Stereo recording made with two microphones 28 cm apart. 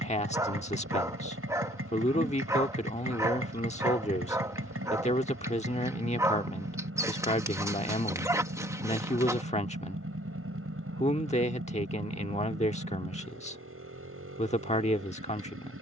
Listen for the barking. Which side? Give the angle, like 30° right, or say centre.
10° right.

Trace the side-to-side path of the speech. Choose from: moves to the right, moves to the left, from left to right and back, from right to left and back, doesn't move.
doesn't move.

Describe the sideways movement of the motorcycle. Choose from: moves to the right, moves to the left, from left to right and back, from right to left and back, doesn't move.
doesn't move.